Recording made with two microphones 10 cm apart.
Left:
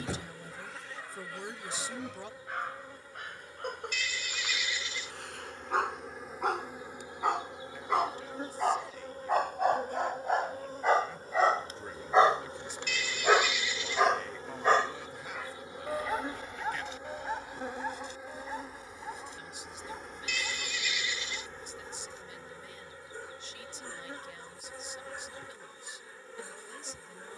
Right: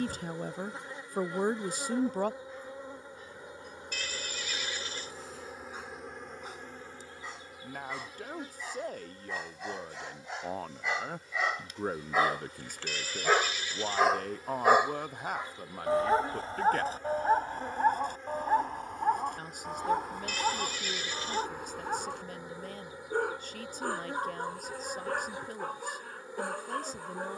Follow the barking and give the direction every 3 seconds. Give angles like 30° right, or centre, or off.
80° left, 70° left, 70° left, 50° left, 10° left, 40° right, 60° right, 60° right, 60° right.